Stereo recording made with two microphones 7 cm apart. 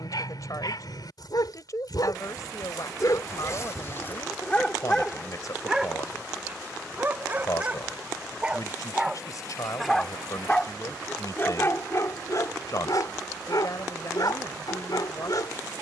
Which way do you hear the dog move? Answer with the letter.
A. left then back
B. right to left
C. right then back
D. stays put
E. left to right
C.